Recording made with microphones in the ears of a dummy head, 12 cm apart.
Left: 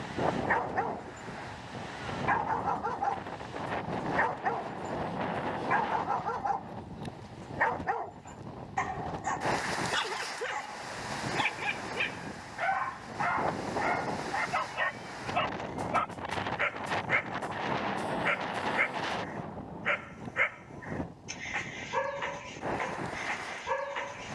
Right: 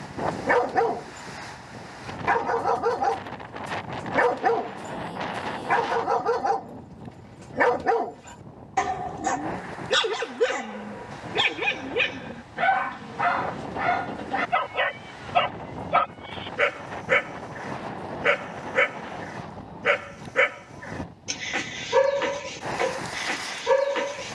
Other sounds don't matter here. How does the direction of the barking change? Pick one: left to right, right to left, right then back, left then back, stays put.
stays put.